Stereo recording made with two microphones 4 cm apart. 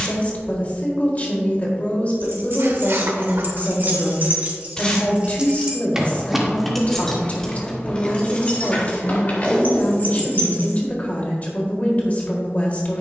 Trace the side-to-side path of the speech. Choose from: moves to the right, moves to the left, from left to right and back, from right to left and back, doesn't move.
doesn't move.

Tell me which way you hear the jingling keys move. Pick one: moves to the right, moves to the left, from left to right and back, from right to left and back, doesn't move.
moves to the left.